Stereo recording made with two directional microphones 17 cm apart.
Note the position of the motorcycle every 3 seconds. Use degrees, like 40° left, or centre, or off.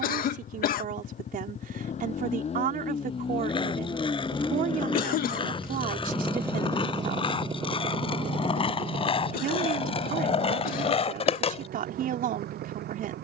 50° left, 20° left, 30° right, 50° right, 70° right.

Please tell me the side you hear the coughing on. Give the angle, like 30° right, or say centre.
60° left.